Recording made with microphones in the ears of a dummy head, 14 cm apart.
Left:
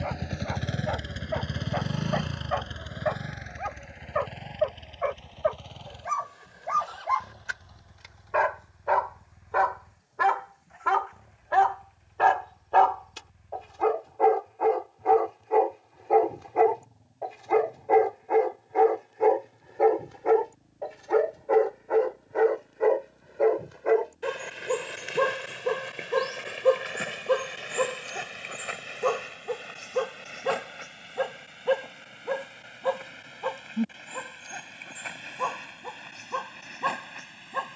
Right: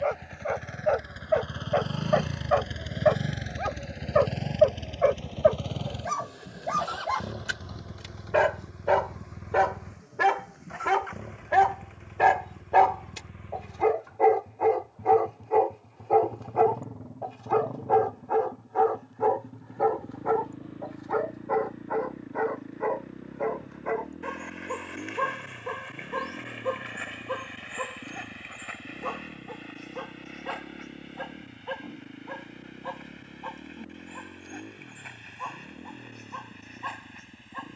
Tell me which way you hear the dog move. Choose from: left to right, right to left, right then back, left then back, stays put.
right to left.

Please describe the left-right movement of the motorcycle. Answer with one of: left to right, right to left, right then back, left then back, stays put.
left to right.